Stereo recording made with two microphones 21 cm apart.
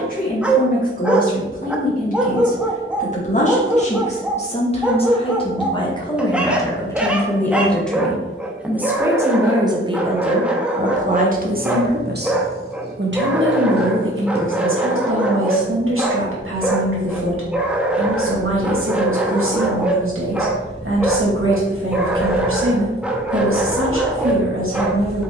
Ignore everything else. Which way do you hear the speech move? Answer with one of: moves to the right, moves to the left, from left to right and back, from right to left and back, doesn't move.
moves to the right.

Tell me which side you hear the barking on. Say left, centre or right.
centre.